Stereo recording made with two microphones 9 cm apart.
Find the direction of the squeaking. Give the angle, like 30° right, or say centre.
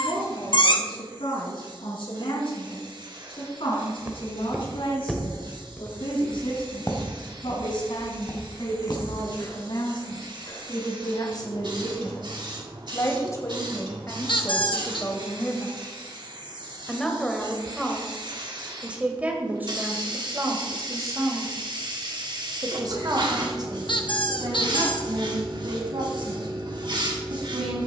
60° left.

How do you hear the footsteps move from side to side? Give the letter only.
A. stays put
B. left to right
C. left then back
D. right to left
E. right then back
D.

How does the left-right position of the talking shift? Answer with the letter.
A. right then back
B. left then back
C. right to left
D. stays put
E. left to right
E.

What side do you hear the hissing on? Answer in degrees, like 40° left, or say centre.
50° right.